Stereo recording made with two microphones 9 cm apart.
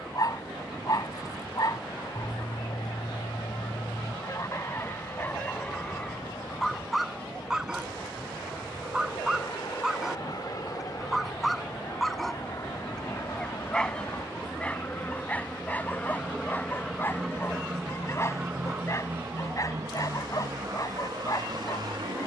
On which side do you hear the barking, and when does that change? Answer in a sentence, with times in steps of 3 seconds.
In this clip you hear the barking on the left from 0 s, in the centre from 6 s and on the left from 15 s.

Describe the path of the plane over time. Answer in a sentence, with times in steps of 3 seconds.
In this clip you hear the plane on the left from 0 s, in the centre from 15 s and on the right from 18 s.